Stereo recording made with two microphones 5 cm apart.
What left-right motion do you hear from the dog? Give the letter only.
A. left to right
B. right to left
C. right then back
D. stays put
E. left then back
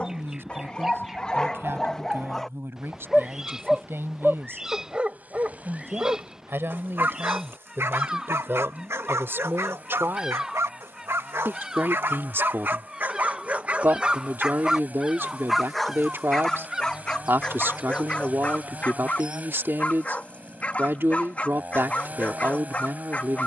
C.